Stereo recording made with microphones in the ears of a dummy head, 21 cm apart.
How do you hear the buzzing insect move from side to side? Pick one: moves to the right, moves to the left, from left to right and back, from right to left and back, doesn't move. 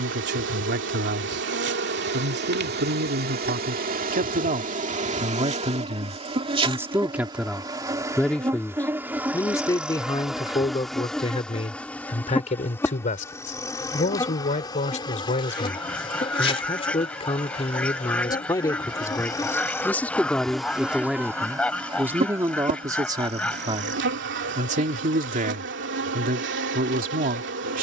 from right to left and back.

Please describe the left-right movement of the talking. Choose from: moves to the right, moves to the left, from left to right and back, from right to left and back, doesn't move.
from right to left and back.